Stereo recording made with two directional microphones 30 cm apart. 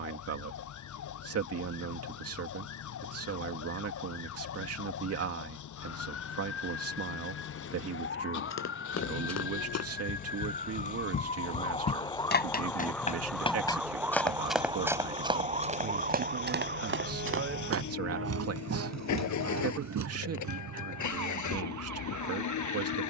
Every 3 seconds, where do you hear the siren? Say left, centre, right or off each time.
left, left, left, left, centre, right, right, right.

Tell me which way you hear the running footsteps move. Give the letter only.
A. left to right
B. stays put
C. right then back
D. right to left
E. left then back
A.